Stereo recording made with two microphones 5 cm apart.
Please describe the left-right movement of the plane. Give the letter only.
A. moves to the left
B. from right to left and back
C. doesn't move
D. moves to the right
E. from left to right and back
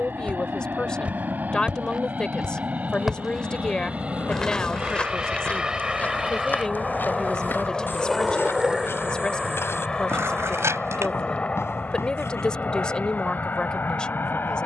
A.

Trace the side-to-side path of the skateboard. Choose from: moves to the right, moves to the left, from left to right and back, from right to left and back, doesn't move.
moves to the right.